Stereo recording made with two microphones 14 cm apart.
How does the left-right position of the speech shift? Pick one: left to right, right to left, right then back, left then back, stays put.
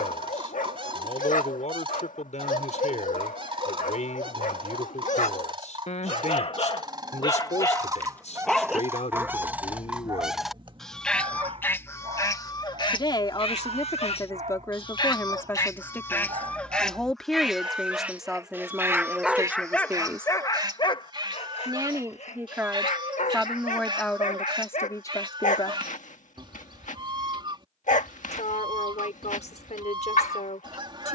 right then back.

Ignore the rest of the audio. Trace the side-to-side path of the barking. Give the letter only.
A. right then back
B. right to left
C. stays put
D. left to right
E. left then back
A.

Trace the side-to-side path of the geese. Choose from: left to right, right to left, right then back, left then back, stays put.
left then back.